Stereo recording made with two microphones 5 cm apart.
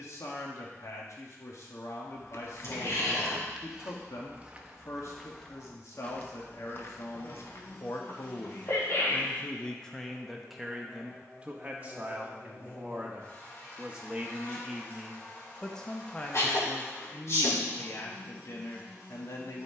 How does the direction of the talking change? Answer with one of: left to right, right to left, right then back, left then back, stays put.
right then back.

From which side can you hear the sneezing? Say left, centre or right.
left.